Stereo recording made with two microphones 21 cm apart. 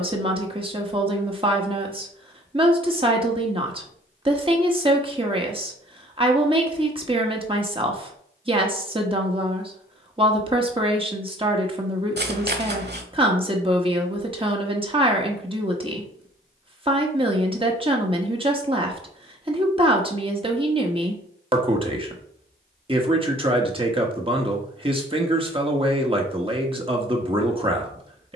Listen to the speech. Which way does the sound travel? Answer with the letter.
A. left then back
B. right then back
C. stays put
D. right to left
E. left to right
C.